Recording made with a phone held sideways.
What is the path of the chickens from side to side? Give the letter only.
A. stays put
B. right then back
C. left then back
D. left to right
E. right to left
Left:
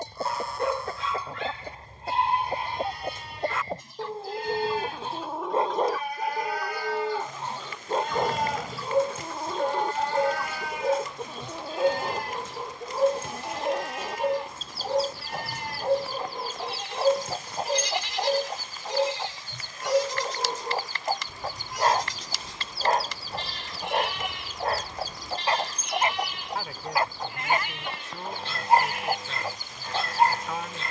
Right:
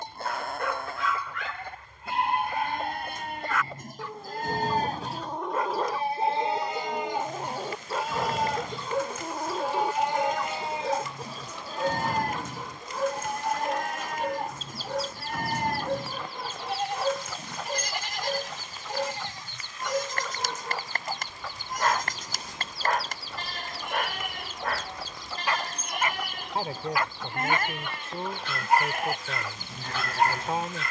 B.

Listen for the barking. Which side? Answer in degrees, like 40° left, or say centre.
30° left.